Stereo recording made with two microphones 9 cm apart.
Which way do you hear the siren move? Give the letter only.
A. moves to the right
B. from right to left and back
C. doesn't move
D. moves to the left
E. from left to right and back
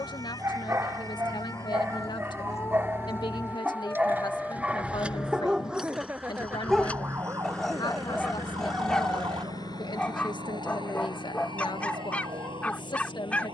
A.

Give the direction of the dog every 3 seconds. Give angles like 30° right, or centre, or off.
30° right, 20° right, centre, 10° left, 10° left.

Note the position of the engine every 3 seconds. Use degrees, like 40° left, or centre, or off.
40° right, 20° right, 20° left, 60° left, 70° left.